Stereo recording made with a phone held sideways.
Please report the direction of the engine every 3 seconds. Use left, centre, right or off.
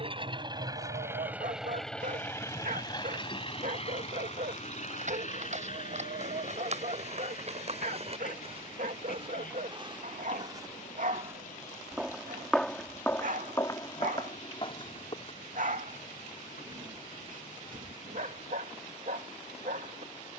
centre, left, left, left, left, left, left.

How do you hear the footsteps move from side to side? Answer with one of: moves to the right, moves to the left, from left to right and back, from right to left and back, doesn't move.
moves to the left.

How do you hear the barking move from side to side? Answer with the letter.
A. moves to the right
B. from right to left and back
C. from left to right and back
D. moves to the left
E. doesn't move
E.